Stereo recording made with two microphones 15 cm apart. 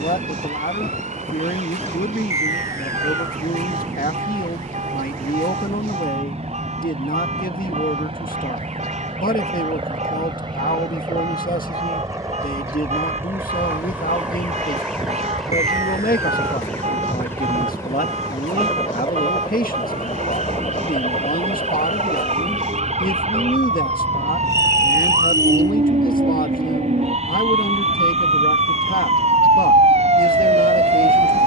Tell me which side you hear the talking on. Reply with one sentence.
In this clip you hear the talking on the left.